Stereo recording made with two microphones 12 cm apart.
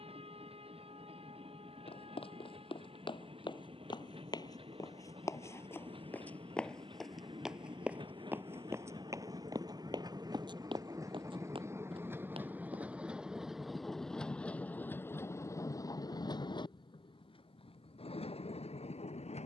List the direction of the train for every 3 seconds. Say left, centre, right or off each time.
right, right, right, right, centre, left, left.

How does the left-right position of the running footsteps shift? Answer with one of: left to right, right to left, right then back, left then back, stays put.
left to right.